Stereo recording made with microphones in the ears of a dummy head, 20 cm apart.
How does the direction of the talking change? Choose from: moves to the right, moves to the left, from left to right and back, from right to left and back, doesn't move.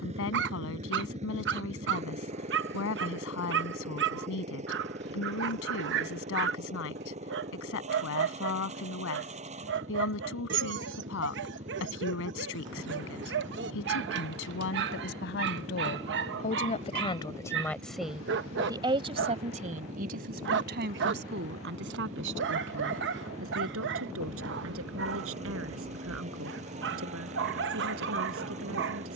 moves to the right.